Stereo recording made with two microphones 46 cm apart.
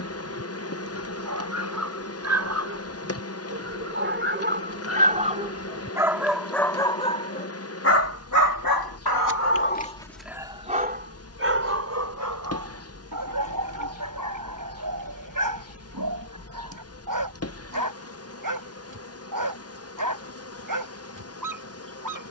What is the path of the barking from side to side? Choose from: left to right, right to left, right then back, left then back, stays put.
left then back.